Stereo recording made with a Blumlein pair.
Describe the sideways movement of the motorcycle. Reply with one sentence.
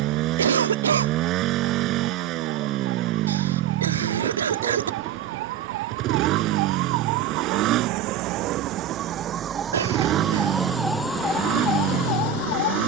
In this clip you hear the motorcycle stay put.